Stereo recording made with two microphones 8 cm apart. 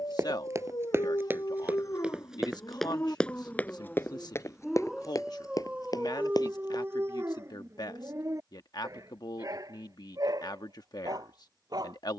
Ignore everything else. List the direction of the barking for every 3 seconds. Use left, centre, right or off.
left, centre, right, right.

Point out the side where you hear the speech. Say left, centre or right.
left.